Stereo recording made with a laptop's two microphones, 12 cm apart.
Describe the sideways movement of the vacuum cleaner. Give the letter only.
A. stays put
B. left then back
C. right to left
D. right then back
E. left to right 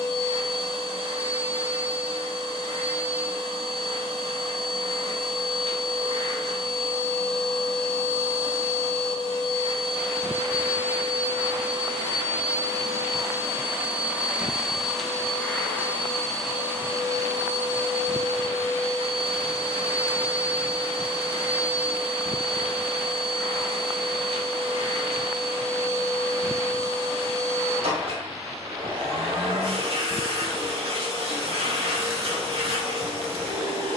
B.